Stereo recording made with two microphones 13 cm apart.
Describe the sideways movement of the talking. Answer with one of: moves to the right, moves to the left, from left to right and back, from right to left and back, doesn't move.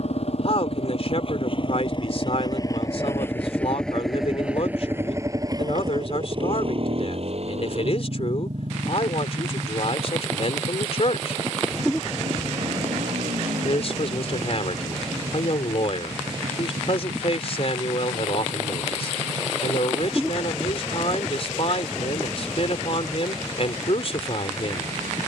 doesn't move.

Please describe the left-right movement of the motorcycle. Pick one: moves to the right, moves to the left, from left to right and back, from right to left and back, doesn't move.
moves to the right.